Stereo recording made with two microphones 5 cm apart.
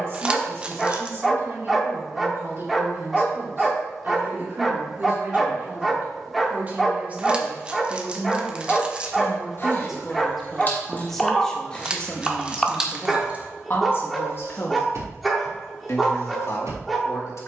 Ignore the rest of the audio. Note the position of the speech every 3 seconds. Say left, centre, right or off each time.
right, right, right, centre, left, left.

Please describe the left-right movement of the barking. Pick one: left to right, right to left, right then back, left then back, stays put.
stays put.